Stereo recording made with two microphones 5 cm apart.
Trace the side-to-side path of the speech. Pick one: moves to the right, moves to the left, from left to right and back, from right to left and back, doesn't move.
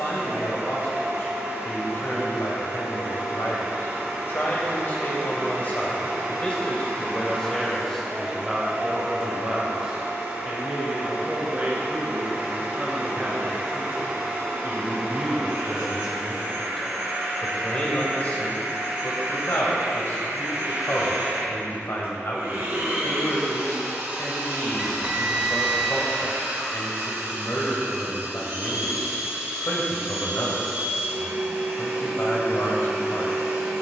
from left to right and back.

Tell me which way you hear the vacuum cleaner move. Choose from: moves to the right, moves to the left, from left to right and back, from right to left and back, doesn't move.
doesn't move.